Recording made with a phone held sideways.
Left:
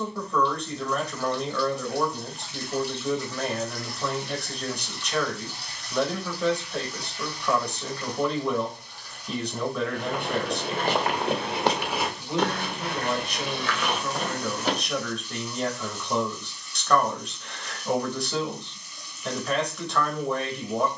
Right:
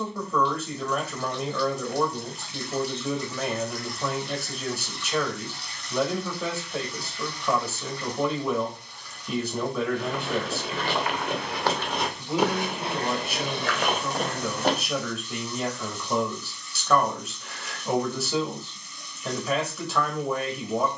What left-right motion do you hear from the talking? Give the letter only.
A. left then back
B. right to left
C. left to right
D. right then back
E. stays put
E.